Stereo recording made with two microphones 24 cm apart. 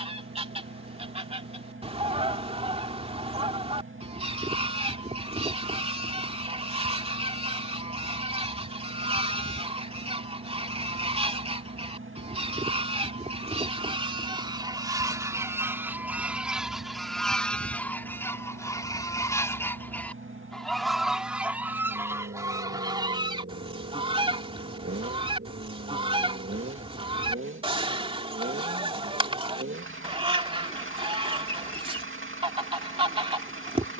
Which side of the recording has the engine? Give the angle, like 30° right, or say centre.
60° right.